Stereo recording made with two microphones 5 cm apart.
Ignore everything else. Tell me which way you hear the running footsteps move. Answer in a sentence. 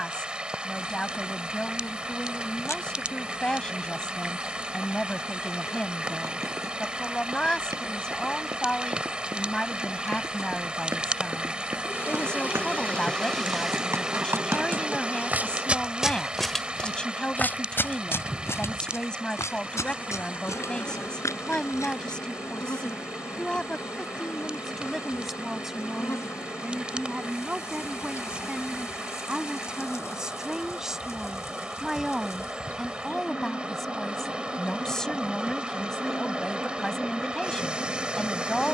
You can hear the running footsteps move to the left.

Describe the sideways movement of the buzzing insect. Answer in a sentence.
You can hear the buzzing insect go right and come back.